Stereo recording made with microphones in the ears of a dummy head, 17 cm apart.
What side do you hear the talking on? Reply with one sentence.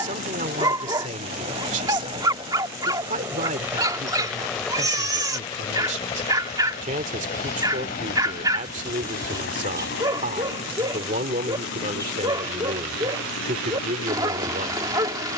You can hear the talking on the right.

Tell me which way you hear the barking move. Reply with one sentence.
You can hear the barking stay in one place.